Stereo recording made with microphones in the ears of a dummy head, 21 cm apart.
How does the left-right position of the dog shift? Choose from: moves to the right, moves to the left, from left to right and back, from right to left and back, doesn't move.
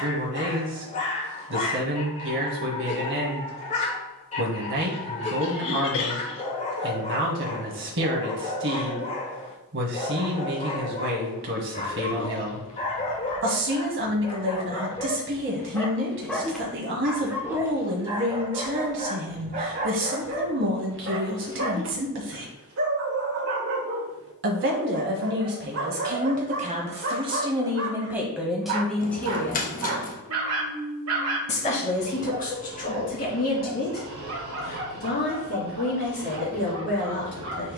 moves to the right.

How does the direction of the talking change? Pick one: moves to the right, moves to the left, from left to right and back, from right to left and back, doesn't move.
moves to the left.